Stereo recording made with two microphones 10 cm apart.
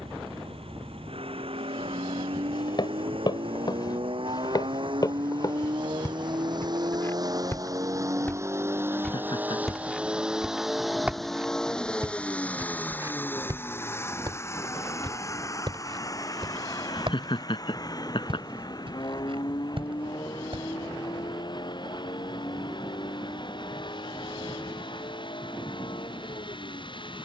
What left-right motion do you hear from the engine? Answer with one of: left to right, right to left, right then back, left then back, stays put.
right to left.